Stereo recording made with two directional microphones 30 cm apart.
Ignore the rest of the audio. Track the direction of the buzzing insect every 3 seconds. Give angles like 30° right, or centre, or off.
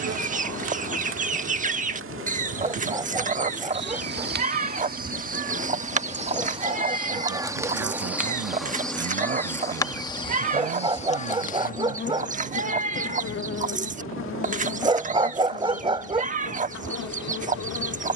50° right, 30° right, 10° right, 20° left, 40° left, 60° left.